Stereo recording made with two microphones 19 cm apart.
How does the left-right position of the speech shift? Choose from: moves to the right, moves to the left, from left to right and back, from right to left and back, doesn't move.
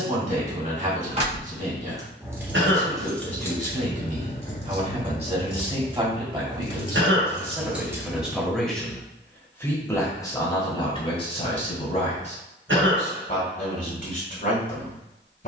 moves to the left.